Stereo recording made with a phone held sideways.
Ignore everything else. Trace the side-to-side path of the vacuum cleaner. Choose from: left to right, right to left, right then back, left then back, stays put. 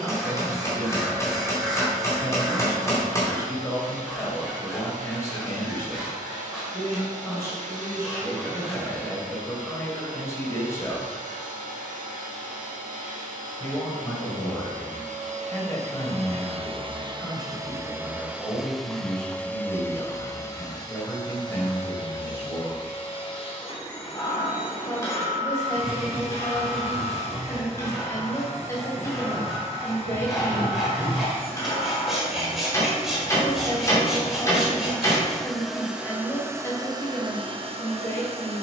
left then back.